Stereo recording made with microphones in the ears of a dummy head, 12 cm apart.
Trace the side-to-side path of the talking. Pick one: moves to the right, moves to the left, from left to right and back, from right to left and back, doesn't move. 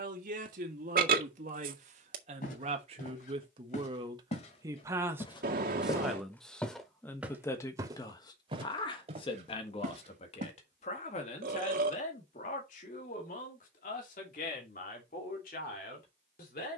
moves to the left.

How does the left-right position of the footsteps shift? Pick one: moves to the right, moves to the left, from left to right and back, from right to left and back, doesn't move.
moves to the right.